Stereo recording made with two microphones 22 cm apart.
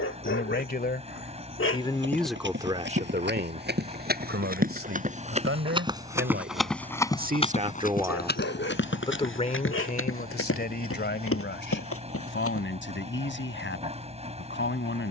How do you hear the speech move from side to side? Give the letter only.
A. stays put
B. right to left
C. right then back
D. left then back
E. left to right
C.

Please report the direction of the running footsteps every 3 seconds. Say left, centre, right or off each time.
right, right, left, left, left.